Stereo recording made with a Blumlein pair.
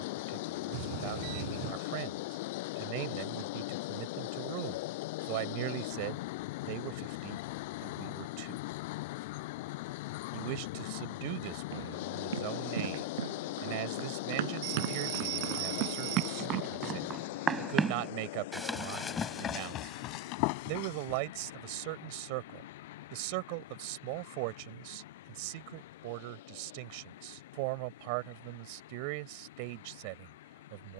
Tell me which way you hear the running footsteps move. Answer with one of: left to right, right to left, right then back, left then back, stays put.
right to left.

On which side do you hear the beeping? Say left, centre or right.
right.